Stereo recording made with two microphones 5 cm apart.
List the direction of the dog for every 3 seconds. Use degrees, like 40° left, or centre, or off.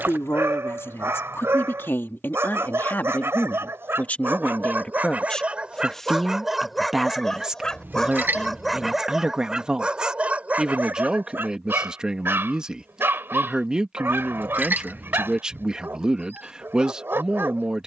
50° right, 40° right, centre, 30° right, 40° right, 40° right.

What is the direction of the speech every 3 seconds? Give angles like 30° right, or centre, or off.
50° left, 20° left, 10° right, 20° right, 20° right, 20° right.